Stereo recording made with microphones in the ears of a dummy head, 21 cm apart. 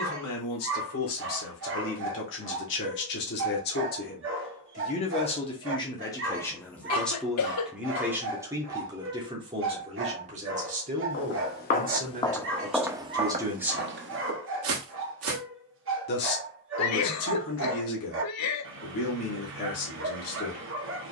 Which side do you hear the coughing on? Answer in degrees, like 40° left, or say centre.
70° left.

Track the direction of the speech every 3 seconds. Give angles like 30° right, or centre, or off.
60° left, 30° left, centre, 30° right, 20° right, 60° left, 60° left.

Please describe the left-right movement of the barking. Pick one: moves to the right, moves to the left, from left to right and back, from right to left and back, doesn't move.
doesn't move.